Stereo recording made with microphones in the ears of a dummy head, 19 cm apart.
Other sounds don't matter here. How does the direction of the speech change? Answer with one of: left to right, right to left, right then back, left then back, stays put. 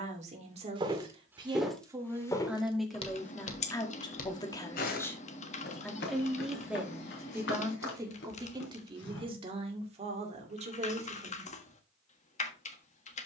left then back.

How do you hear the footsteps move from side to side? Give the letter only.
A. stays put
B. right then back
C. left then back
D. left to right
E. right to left
E.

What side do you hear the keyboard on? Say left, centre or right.
left.